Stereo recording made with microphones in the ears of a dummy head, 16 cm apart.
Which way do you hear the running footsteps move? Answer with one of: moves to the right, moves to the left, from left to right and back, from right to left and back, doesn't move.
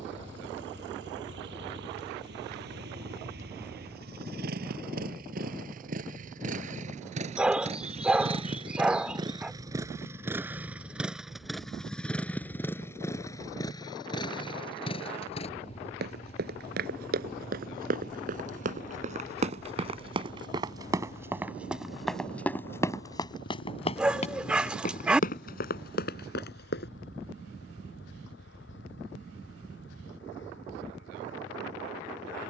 moves to the left.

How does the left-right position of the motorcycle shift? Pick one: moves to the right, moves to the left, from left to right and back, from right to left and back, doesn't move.
moves to the left.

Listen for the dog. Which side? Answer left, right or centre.
centre.